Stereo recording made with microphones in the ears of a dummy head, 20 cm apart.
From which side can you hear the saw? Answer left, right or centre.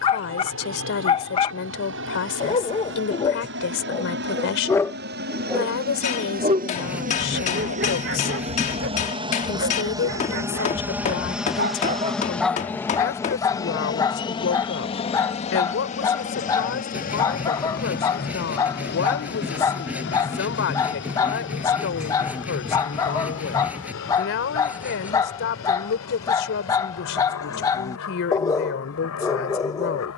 centre.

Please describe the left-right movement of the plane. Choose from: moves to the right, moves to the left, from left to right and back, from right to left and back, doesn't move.
moves to the left.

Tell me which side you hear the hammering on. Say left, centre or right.
left.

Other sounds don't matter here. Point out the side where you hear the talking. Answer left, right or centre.
left.